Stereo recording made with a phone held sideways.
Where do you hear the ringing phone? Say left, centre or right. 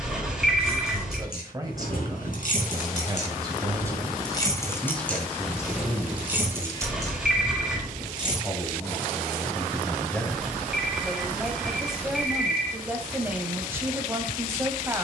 centre.